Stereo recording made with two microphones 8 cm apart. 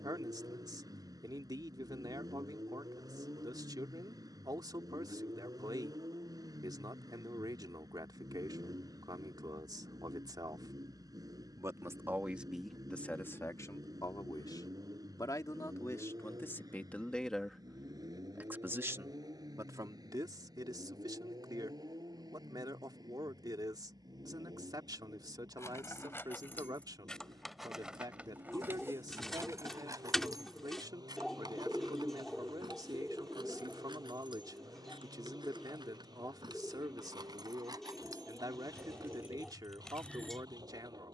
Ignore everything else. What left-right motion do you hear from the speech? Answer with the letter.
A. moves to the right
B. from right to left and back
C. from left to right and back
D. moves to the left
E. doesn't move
B.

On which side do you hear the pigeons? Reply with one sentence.
You can hear the pigeons in the centre.